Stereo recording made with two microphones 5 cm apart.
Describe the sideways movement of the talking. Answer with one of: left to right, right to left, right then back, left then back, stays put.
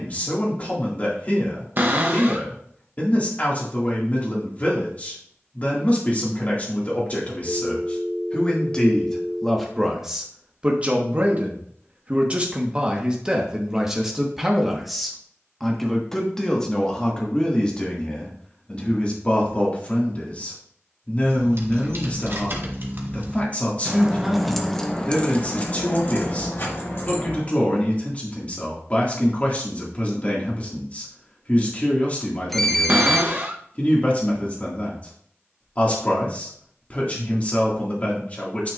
right then back.